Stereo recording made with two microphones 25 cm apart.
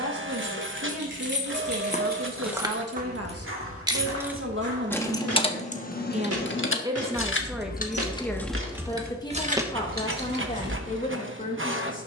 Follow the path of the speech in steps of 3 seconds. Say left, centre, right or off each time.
right, right, centre, left.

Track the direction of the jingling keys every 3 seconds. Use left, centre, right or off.
right, centre, left, right.